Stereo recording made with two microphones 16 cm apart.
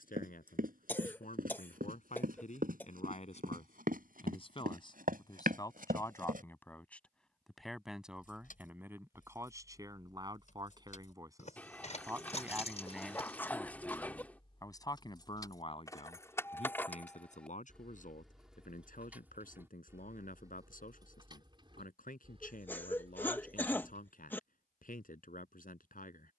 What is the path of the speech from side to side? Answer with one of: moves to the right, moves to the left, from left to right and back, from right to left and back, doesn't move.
from left to right and back.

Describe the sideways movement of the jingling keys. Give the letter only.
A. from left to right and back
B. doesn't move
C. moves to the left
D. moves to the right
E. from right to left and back
D.